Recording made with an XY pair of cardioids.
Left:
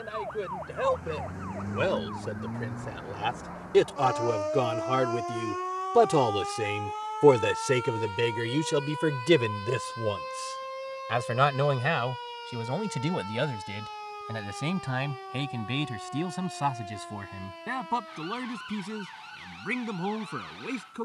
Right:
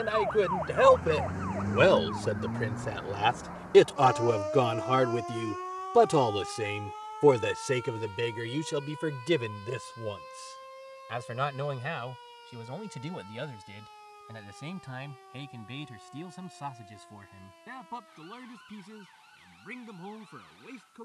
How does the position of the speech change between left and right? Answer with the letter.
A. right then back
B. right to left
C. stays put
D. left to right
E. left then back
B.